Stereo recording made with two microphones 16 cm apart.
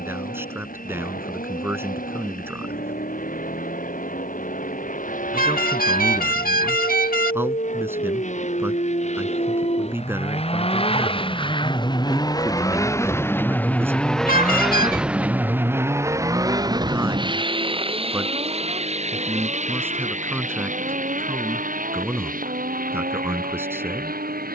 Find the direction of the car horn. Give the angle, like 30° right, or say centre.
70° left.